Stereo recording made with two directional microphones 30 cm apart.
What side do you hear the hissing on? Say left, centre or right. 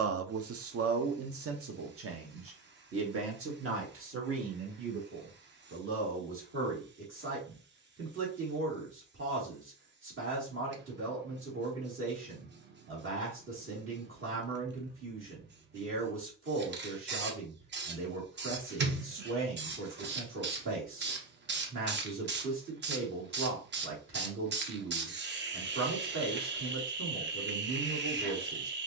right.